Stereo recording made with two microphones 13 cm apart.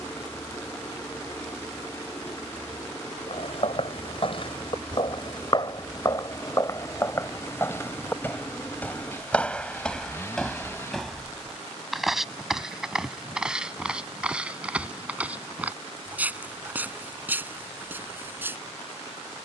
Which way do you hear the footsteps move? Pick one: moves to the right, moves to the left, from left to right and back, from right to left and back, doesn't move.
moves to the right.